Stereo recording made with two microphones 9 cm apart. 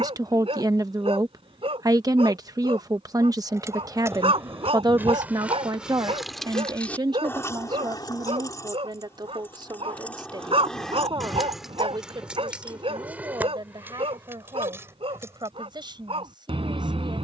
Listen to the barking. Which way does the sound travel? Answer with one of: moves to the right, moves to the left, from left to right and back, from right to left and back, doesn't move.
doesn't move.